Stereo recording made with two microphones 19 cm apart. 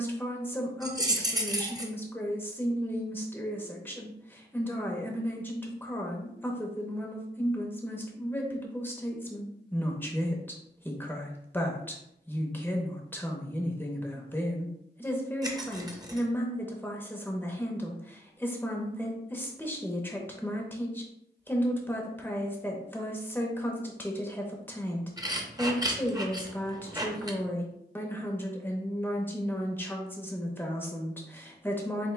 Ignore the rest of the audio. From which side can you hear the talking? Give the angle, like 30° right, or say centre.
10° left.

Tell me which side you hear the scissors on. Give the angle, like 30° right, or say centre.
20° right.